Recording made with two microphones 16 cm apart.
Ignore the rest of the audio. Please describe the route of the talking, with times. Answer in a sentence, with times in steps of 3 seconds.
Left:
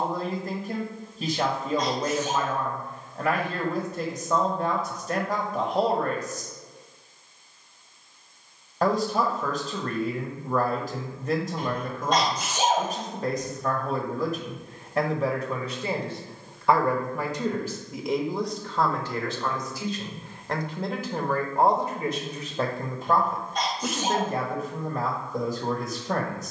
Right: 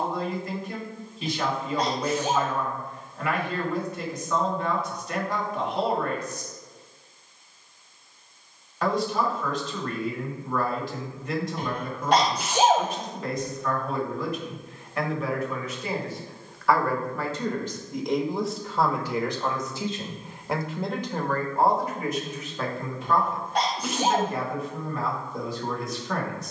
In this clip you hear the talking on the left from 0 s, in the centre from 18 s and on the left from 21 s.